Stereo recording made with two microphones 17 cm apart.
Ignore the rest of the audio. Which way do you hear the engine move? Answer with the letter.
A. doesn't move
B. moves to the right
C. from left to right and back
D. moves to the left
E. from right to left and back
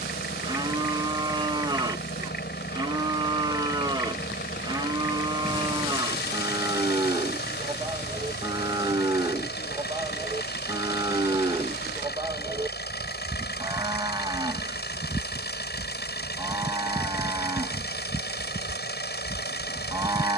A.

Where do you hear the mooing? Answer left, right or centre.
right.